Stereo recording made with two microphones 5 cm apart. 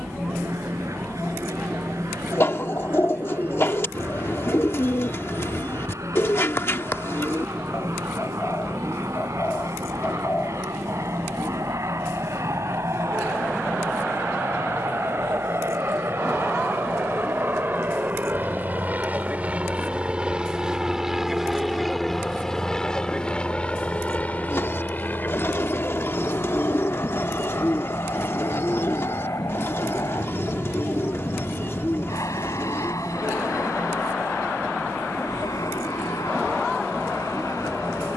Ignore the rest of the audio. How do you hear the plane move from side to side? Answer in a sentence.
In this clip you hear the plane move from right to left.